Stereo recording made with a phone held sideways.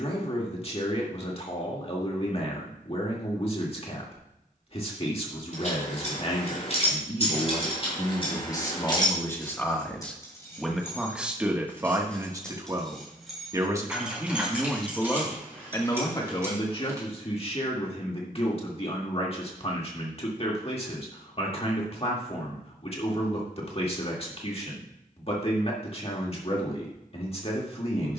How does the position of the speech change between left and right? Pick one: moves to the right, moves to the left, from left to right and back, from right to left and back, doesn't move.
from left to right and back.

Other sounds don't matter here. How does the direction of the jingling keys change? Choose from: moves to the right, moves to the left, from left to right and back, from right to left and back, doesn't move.
moves to the right.